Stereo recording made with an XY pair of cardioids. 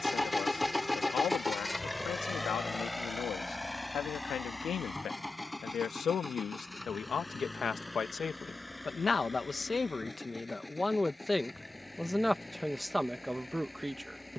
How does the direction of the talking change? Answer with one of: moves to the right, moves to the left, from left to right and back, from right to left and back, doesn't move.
moves to the right.